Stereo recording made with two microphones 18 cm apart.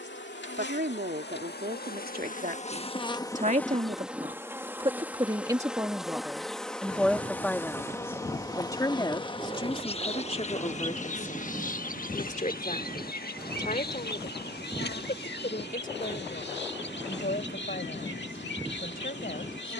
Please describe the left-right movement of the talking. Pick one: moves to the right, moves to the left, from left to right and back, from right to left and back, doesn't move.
moves to the left.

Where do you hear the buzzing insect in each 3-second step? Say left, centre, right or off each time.
left, centre, centre, left, left, left, left.